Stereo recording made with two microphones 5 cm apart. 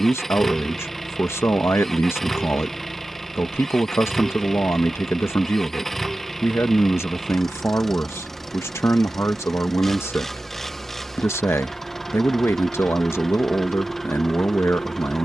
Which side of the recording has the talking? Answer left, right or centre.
left.